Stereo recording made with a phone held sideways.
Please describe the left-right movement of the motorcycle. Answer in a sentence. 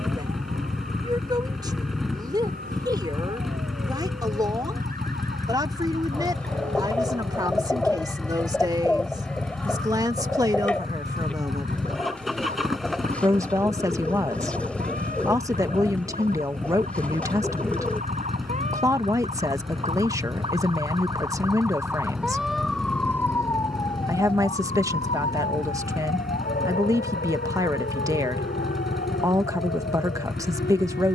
You can hear the motorcycle stay in one place.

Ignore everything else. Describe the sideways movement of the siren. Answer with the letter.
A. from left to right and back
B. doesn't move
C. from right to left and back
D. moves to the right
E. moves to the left
E.